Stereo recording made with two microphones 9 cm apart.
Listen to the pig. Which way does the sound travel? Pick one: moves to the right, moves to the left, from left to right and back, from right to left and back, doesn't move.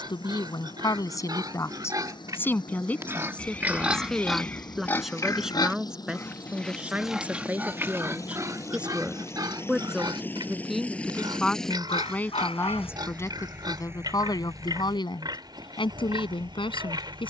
from right to left and back.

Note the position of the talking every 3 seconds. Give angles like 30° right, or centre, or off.
30° left, centre, 10° right, centre, 30° left, 60° left.